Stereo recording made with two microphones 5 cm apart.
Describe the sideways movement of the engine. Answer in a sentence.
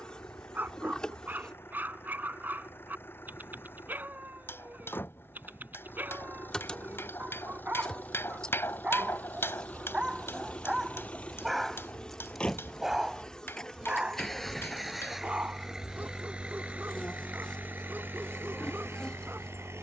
In this clip you hear the engine move from left to right.